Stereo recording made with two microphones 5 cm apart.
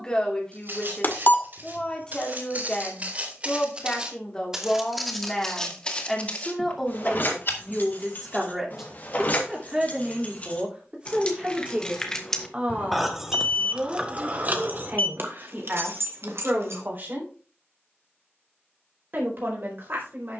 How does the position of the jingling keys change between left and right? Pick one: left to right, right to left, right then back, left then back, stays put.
left to right.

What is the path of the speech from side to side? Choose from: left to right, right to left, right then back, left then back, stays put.
left to right.